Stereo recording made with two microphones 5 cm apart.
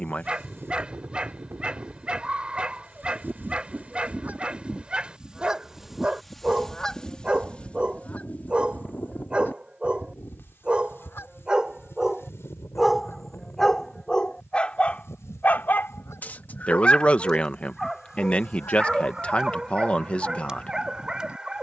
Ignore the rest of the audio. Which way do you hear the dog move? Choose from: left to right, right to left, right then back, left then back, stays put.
left then back.